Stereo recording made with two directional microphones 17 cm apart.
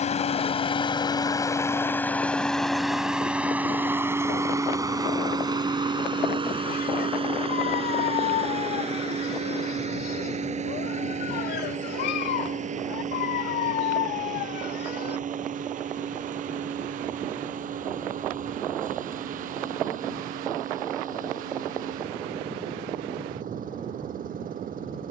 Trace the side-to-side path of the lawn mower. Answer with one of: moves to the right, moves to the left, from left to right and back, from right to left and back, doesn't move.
moves to the right.